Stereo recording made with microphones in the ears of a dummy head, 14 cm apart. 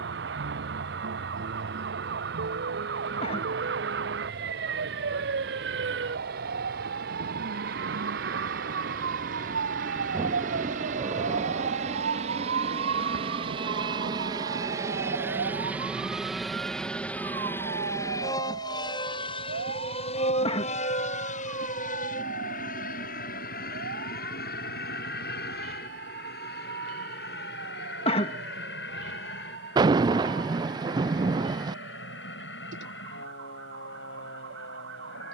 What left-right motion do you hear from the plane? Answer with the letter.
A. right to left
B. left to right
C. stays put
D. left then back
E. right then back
A.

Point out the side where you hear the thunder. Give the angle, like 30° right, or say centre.
30° right.